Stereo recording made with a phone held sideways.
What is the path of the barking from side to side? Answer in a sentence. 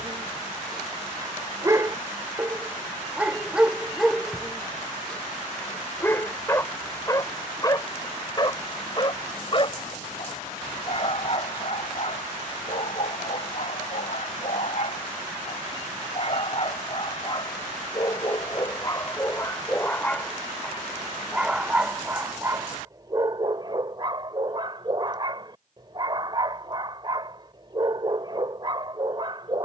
In this clip you hear the barking move from right to left and back again.